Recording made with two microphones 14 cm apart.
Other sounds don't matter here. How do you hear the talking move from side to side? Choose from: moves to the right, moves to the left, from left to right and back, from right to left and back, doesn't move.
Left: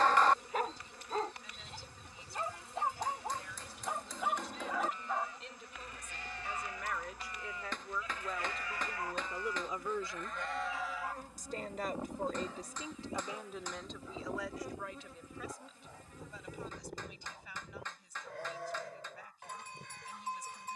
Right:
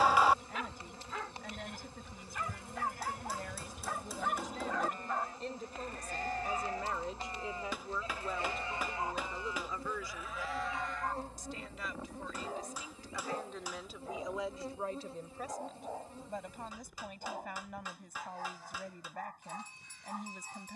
from right to left and back.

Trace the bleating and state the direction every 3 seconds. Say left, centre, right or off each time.
right, right, right, centre, left, left, left.